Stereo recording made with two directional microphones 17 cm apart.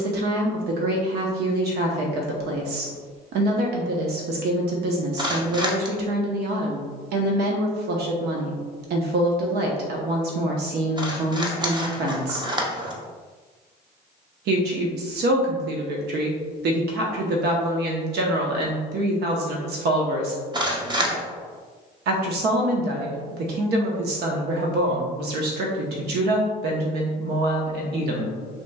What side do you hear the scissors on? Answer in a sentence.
In this clip you hear the scissors on the right.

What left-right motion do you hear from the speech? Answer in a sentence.
In this clip you hear the speech stay in one place.